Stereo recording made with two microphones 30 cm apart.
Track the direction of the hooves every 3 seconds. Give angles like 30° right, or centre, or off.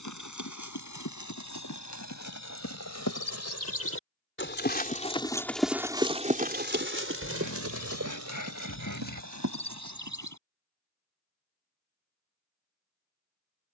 70° left, 30° left, 50° right, 70° right, off.